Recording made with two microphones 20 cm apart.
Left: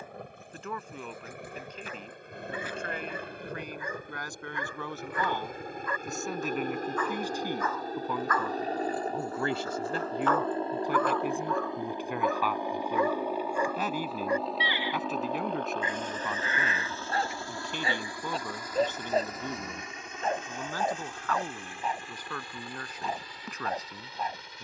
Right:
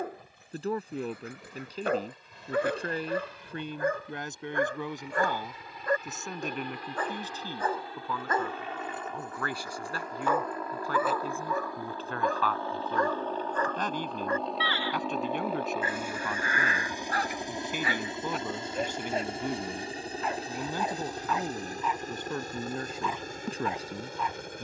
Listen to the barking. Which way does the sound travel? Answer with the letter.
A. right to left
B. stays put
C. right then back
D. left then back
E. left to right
A.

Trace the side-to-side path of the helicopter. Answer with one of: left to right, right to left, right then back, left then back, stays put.
left to right.